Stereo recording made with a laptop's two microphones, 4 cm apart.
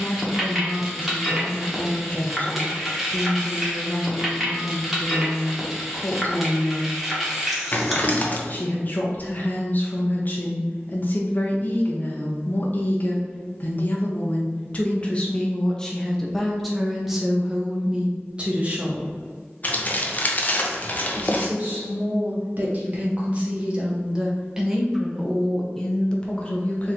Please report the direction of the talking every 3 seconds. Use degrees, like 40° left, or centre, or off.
40° left, 40° left, 40° left, 40° left, 40° left, centre, 30° right, 40° right, 10° left.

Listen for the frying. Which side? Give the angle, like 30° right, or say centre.
centre.